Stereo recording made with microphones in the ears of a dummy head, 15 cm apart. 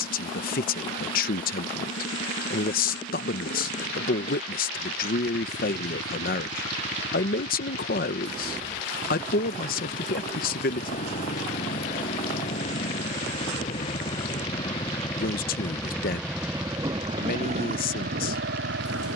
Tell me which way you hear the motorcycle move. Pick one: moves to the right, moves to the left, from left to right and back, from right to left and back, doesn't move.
moves to the right.